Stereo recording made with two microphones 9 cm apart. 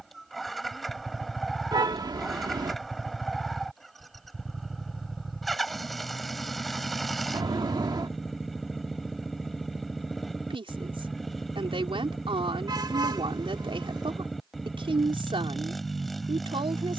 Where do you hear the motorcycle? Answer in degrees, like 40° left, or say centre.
centre.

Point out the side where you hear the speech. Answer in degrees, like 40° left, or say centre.
80° right.